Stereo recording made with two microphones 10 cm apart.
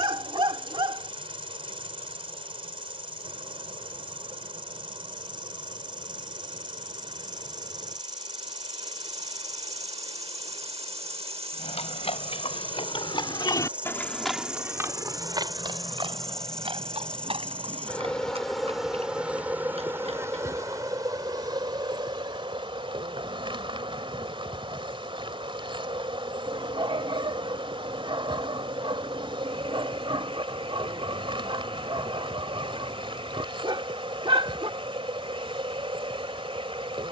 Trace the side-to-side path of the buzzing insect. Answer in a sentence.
You can hear the buzzing insect go left and come back.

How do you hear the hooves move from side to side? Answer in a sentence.
In this clip you hear the hooves travel towards the right.